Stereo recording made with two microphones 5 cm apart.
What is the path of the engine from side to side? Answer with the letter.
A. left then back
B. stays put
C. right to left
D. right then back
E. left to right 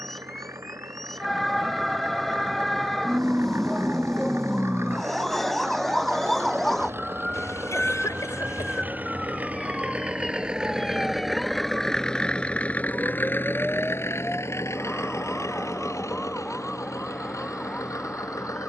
C.